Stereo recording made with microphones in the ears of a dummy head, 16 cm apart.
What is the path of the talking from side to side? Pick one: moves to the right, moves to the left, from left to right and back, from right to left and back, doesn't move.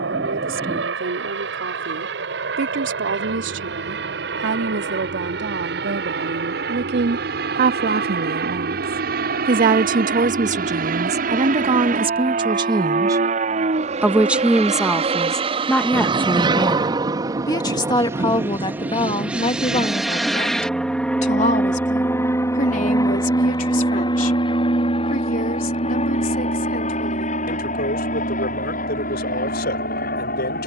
moves to the left.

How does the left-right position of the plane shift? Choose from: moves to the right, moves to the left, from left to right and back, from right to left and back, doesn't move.
moves to the left.